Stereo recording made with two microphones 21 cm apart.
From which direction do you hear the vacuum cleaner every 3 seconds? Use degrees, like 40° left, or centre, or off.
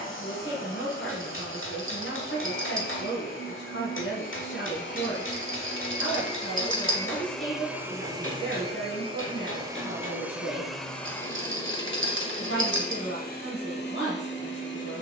60° left, 60° left, centre, centre, 50° left.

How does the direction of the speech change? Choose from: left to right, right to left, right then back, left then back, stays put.
stays put.